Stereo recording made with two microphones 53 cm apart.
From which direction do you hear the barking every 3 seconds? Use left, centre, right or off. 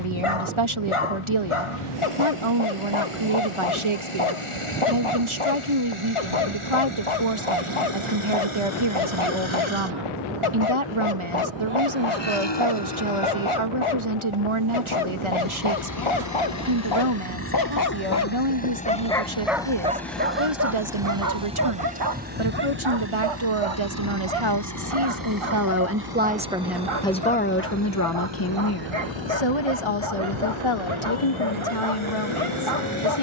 left, left, left, left, left, left, centre, right, right, right, right.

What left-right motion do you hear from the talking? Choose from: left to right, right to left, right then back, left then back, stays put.
right to left.